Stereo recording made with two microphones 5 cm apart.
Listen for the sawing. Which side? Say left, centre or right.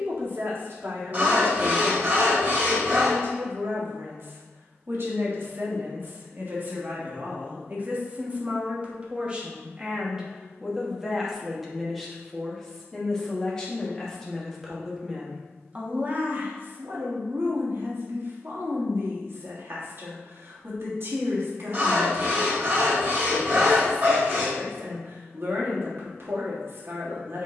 right.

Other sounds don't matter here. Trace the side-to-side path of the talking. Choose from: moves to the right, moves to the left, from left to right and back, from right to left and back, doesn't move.
from right to left and back.